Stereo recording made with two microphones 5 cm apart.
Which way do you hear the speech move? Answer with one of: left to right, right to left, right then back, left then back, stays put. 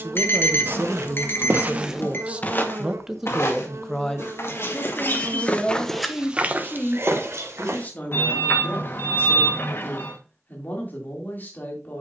right to left.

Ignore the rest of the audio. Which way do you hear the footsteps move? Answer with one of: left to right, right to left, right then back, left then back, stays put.
left then back.